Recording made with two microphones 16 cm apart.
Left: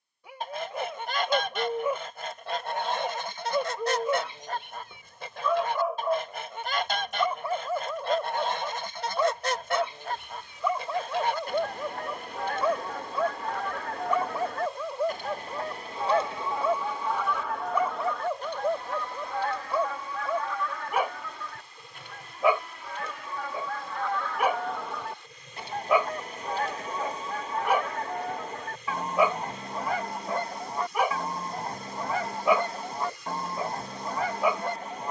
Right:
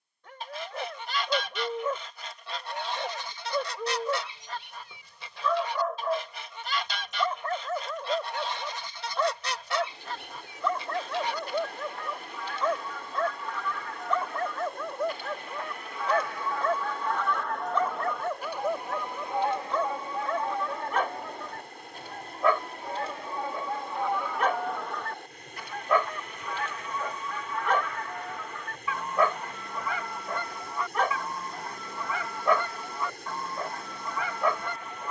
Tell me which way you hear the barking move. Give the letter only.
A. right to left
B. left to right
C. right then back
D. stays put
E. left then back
D.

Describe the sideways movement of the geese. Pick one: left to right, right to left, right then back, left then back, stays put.
right then back.